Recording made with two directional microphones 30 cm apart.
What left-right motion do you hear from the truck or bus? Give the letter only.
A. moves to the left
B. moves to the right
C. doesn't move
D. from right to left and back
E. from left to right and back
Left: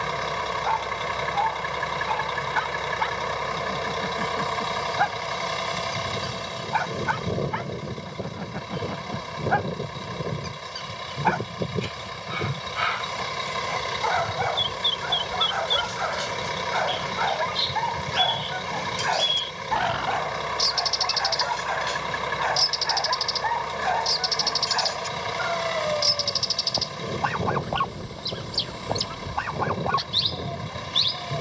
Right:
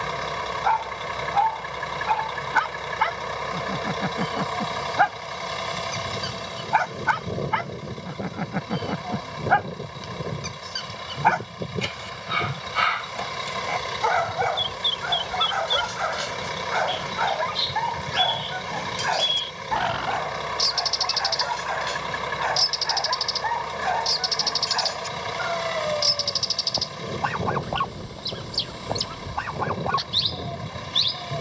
C.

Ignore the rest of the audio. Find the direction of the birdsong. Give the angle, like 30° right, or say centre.
centre.